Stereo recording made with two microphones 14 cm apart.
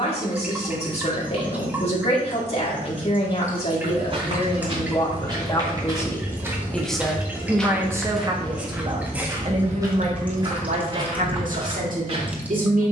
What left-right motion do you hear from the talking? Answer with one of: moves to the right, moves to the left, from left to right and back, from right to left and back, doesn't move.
moves to the right.